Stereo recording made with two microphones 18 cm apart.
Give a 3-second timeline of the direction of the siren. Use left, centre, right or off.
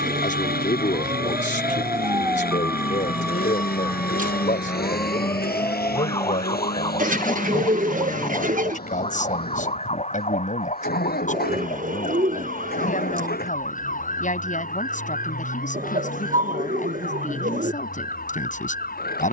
right, centre, left, left, left, left, left.